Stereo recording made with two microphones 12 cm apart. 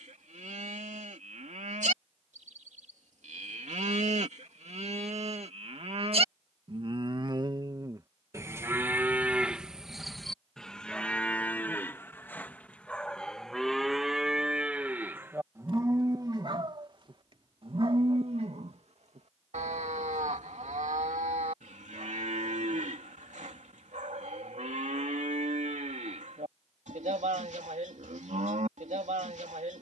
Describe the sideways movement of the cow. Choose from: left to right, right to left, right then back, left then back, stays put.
left then back.